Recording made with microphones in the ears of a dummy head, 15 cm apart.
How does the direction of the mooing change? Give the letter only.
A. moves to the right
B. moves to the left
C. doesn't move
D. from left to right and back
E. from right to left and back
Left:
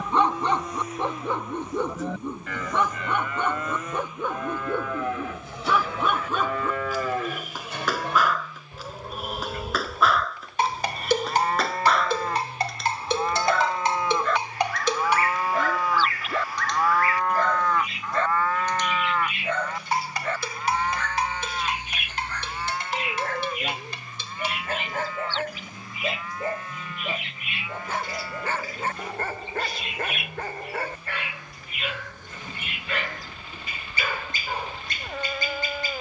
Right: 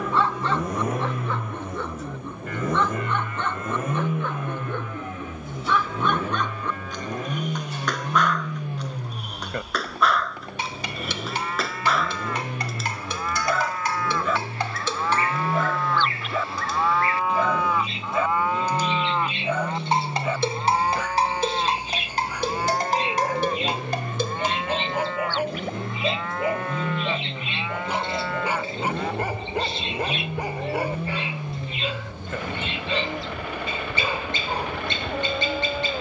A.